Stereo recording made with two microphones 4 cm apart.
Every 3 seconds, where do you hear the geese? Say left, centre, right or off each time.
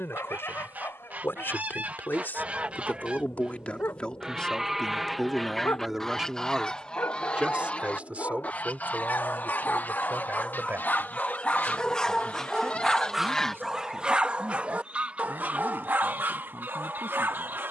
right, centre, left, left, centre, right.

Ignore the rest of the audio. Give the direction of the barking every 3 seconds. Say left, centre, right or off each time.
left, left, left, left, centre, right.